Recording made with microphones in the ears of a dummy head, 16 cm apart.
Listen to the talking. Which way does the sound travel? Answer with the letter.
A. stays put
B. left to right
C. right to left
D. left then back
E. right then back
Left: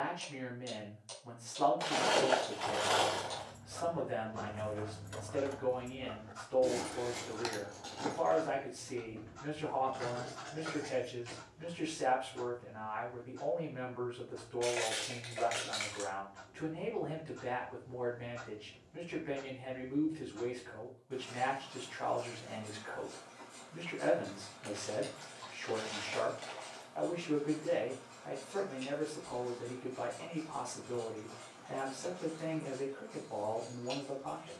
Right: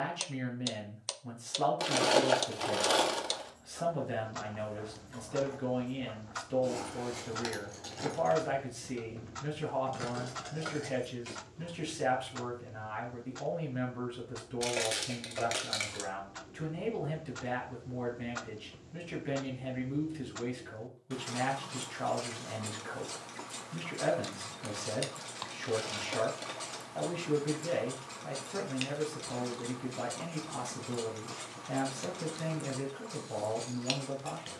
A.